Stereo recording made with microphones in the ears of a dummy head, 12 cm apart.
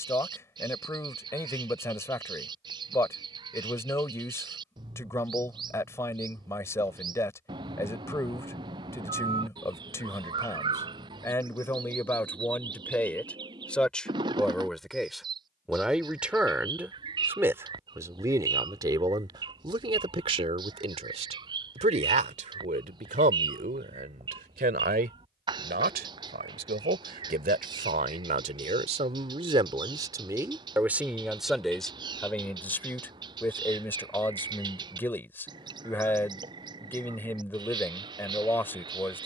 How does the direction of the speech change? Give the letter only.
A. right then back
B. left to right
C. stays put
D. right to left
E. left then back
A.